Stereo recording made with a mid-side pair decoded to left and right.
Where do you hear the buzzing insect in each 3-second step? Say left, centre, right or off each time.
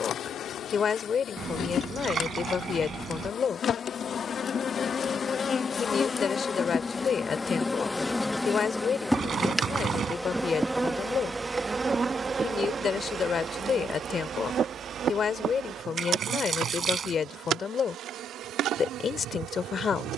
left, left, left, centre, right, right, right.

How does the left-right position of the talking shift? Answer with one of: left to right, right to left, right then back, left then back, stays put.
stays put.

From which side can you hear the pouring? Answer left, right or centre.
right.